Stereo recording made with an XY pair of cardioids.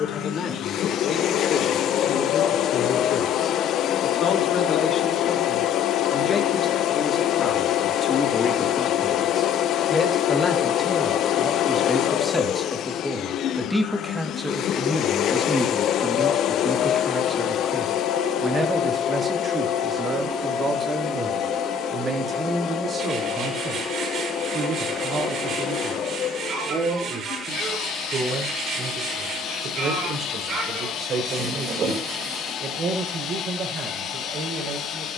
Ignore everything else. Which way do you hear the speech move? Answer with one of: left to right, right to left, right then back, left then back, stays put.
left to right.